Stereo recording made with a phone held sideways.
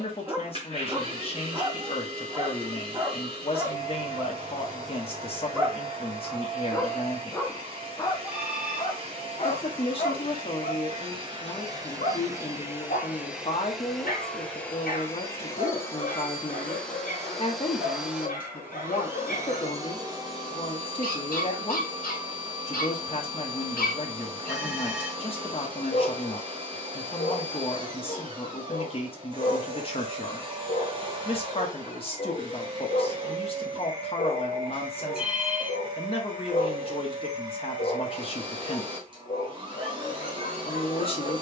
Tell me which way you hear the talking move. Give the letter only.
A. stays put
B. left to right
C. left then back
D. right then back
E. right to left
A.